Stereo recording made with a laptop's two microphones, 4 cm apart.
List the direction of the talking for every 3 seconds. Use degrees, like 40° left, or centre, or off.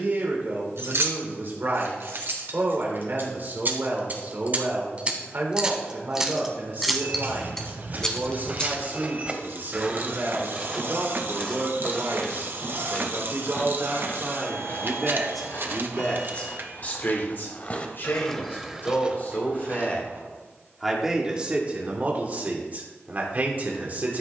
50° right, 50° right, 50° right, 50° right, 40° right, 30° left, 40° left, 30° right.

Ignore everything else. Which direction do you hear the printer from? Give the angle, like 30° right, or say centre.
50° right.